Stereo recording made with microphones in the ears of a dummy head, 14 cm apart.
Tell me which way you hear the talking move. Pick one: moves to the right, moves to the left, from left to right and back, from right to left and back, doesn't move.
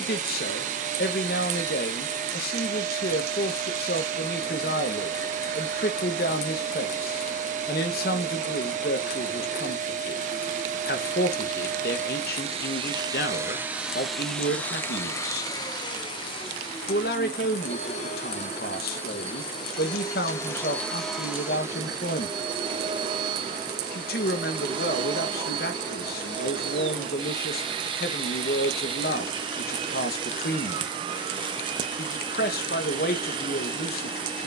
doesn't move.